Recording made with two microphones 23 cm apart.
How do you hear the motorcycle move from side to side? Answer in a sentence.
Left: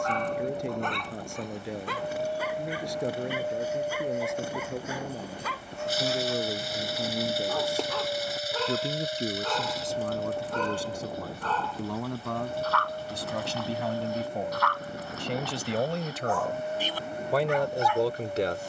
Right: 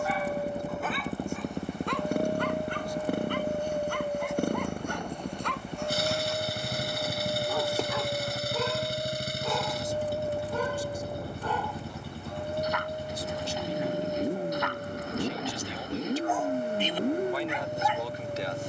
In this clip you hear the motorcycle stay put.